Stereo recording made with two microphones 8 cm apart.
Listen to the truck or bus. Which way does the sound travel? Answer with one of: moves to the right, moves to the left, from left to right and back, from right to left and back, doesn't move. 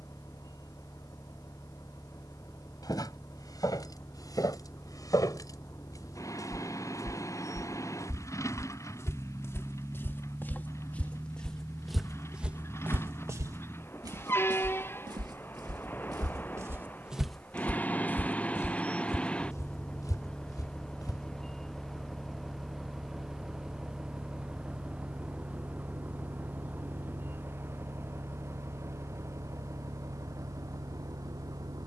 moves to the right.